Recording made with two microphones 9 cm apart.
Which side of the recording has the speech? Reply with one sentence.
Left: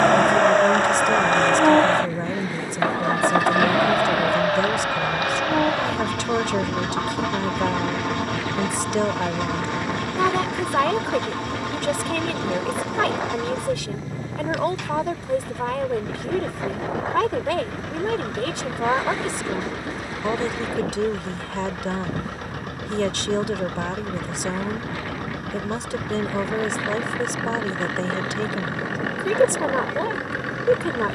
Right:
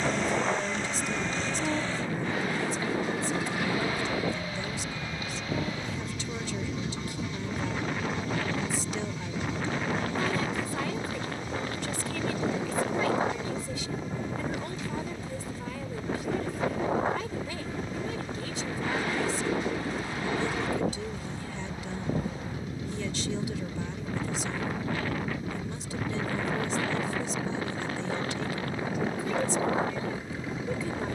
In this clip you hear the speech on the left.